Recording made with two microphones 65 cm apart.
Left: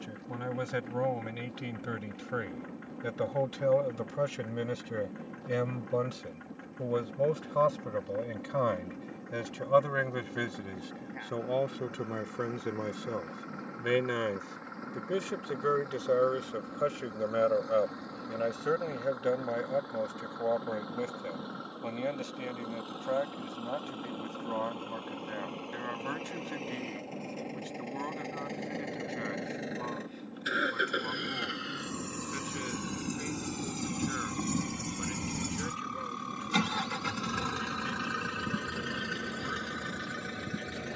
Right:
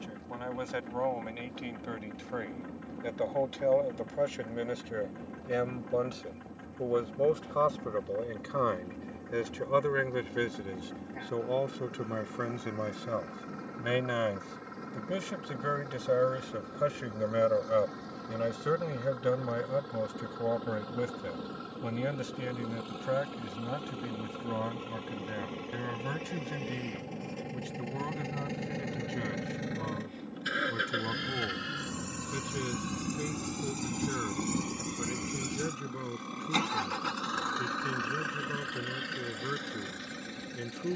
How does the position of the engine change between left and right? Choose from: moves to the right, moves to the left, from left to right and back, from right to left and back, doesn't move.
moves to the left.